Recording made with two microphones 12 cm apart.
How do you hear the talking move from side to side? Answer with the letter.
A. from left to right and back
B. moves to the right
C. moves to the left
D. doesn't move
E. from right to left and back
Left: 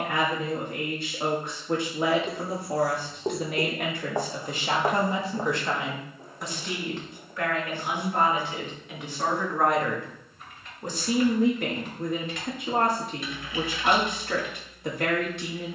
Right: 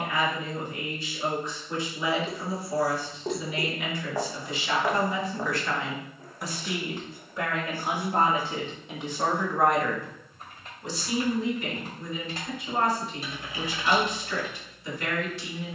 A.